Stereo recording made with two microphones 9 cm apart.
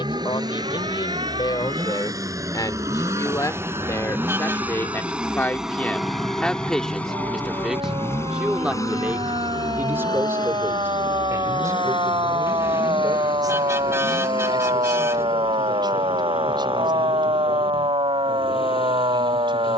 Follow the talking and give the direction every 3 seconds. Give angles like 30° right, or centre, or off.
50° left, 30° left, centre, 30° right, 40° right, 50° right, 60° right.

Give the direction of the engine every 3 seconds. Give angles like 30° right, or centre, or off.
40° right, 20° right, 20° left, 50° left, 70° left, 80° left, 80° left.